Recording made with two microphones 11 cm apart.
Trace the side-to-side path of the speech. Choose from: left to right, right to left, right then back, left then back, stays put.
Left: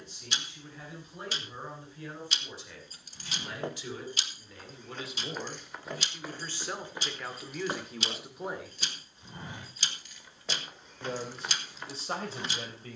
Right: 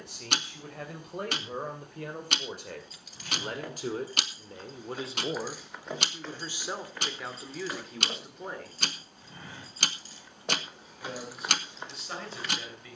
right to left.